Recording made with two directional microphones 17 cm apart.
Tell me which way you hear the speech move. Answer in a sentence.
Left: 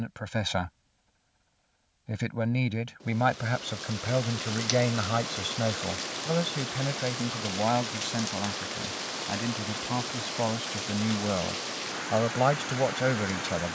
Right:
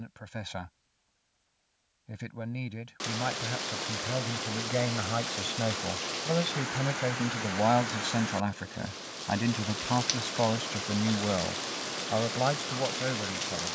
In this clip you hear the speech go right and come back.